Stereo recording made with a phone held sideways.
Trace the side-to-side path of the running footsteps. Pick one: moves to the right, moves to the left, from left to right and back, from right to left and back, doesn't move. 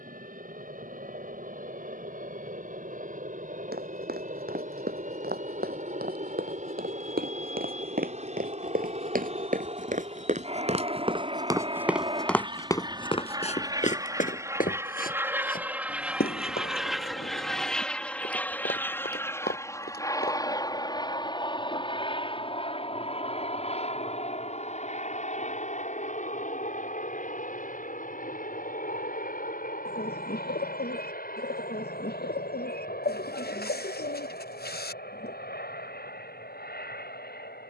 moves to the left.